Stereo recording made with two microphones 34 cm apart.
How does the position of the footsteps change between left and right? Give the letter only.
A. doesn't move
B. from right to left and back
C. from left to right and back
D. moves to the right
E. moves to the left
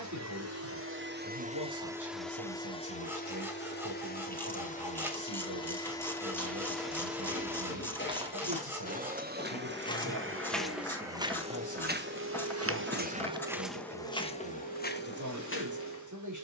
C.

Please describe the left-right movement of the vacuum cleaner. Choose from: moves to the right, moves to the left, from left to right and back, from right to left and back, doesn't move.
from right to left and back.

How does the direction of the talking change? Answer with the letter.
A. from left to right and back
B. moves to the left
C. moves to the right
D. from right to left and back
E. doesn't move
E.